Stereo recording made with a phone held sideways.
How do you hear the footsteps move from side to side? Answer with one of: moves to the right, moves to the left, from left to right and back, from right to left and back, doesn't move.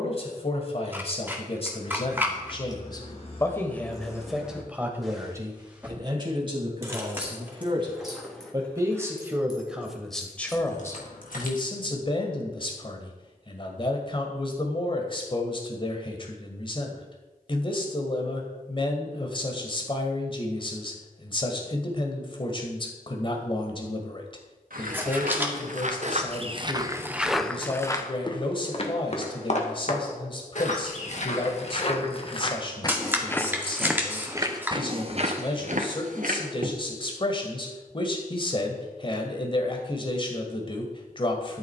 from right to left and back.